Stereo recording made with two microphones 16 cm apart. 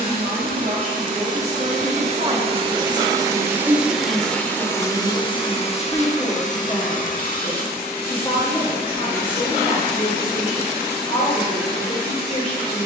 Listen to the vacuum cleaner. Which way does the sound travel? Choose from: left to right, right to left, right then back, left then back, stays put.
right to left.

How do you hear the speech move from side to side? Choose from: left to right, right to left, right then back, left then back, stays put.
right to left.